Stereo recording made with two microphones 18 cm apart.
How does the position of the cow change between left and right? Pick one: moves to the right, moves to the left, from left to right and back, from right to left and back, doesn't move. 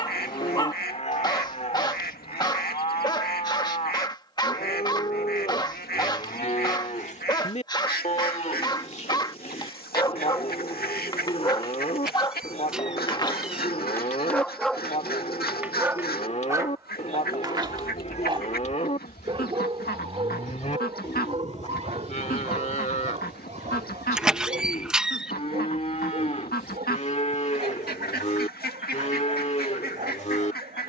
doesn't move.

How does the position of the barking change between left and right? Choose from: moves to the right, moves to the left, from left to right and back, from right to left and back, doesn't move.
moves to the right.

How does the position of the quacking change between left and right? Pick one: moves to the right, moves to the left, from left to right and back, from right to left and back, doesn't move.
doesn't move.